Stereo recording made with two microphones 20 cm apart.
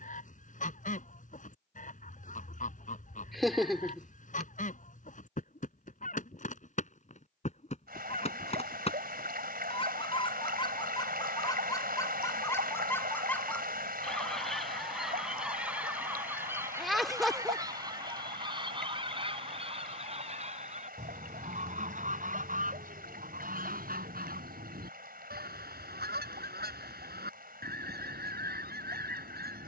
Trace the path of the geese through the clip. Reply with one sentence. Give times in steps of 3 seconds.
You can hear the geese on the left from 0 s, in the centre from 12 s and on the right from 18 s.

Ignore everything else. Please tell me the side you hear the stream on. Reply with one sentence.
In this clip you hear the stream on the right.